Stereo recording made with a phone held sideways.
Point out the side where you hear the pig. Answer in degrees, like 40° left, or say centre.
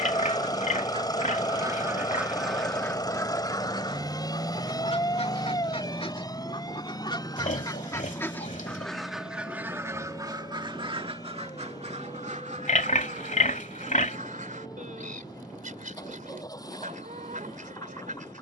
60° left.